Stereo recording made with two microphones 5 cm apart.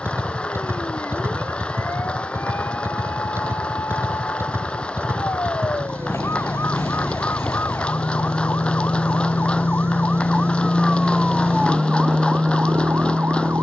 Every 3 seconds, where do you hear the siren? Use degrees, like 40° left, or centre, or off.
80° left, 70° left, 60° left, 20° left, 40° right.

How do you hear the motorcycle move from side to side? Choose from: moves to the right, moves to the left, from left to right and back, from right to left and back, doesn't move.
doesn't move.